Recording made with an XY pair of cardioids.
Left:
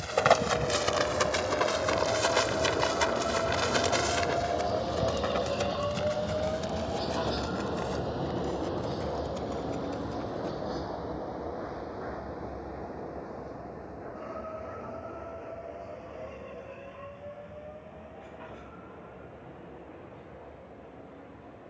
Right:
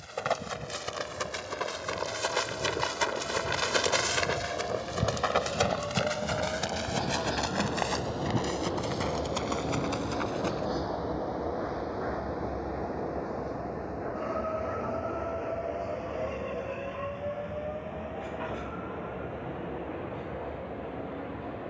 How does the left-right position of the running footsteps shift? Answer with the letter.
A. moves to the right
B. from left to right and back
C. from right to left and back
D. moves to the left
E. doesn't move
A.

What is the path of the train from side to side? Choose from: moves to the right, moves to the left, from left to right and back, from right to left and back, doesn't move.
moves to the right.